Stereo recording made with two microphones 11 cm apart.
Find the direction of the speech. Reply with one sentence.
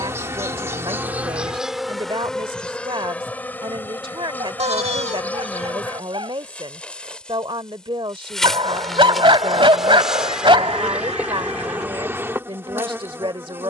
You can hear the speech on the right.